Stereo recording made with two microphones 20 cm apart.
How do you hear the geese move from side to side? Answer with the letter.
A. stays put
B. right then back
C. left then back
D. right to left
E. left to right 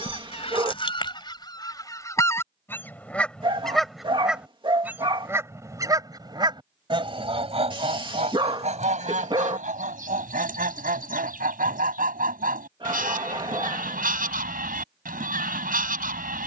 E.